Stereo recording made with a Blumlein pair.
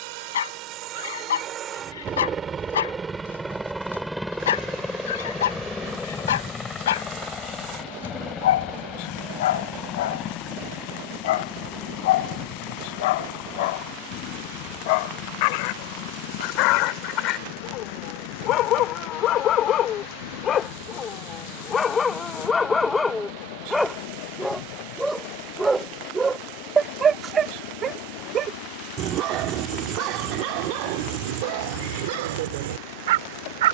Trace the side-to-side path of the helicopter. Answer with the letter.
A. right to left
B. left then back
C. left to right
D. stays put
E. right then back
A.